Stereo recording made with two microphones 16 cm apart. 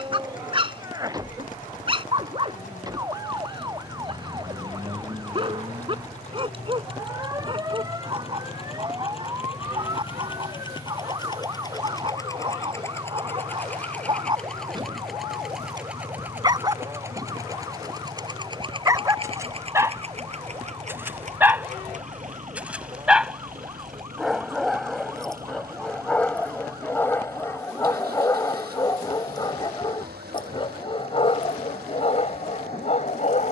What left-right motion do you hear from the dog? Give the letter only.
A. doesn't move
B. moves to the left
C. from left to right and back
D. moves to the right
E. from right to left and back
B.